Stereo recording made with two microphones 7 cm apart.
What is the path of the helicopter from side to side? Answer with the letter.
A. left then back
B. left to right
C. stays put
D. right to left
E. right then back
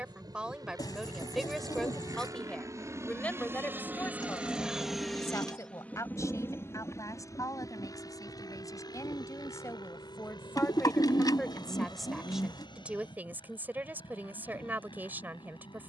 D.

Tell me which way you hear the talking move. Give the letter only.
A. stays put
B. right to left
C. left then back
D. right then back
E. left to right
C.